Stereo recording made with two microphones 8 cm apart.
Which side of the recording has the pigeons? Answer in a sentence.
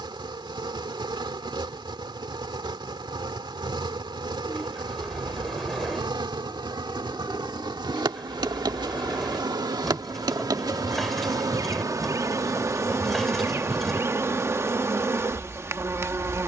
In this clip you hear the pigeons in the centre.